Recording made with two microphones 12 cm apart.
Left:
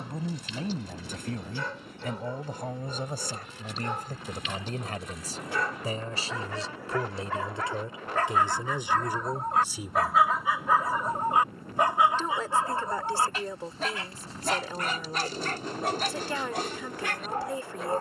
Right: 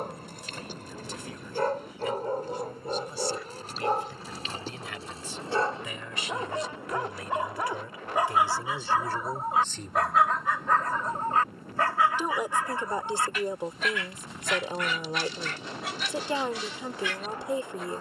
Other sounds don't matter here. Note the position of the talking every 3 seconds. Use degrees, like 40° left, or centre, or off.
50° left, 40° left, 30° left, 10° left, 20° right, 20° right.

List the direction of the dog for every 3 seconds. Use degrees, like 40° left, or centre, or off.
50° right, 40° right, 20° right, 10° left, 30° left, 50° left.